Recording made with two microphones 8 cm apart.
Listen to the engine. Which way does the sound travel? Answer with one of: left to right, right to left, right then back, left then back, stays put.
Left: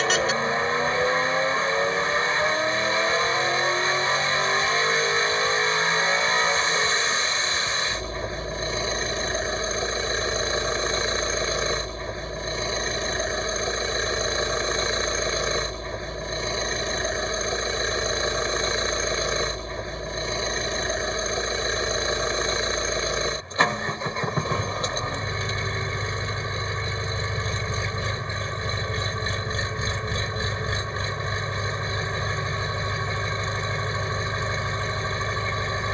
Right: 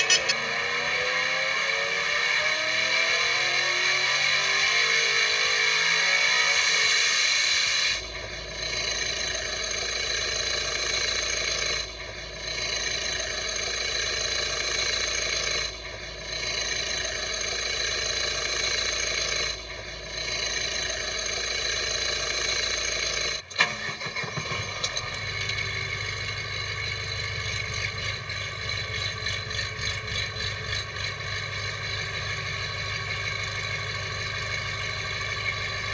stays put.